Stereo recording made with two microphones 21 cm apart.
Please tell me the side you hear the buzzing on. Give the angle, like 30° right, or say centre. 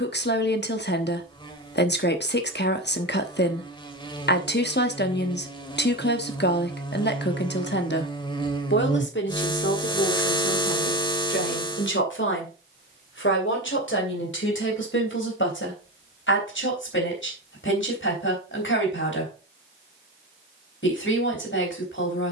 20° left.